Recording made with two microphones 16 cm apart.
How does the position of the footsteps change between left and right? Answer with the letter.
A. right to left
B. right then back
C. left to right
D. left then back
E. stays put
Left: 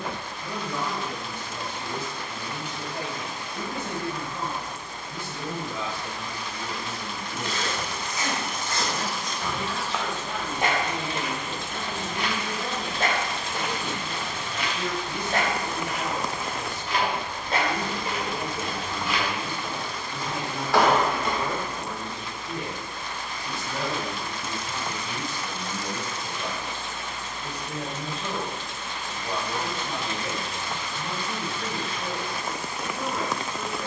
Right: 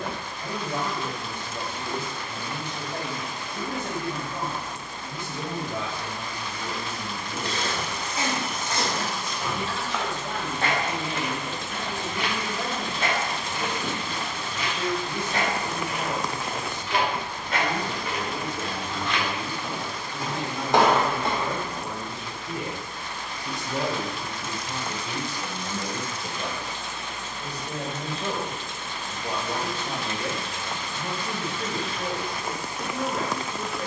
D.